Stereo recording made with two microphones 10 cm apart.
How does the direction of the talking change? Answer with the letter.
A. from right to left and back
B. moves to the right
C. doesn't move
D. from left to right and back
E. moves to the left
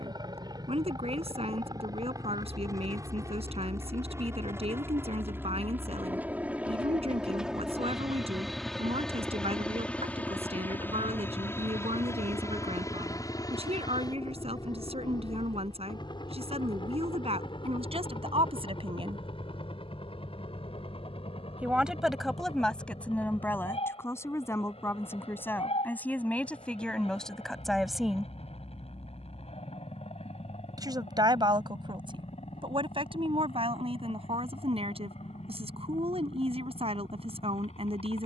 A.